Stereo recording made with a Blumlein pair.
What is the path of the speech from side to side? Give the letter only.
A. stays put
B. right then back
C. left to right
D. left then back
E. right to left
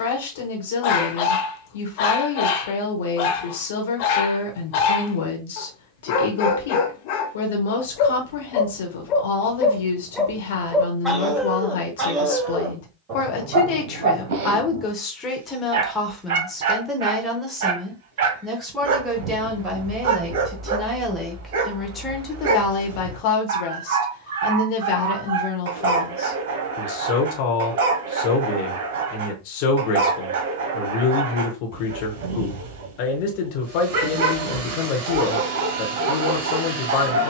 B.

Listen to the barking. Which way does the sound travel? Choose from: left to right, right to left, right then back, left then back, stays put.
left to right.